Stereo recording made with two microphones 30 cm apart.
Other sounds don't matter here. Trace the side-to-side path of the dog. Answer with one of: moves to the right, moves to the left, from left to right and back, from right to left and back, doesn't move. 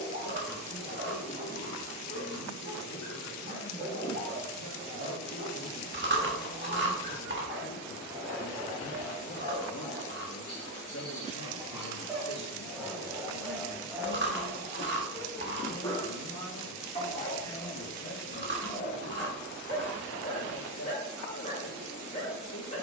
moves to the left.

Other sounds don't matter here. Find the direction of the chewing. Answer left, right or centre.
right.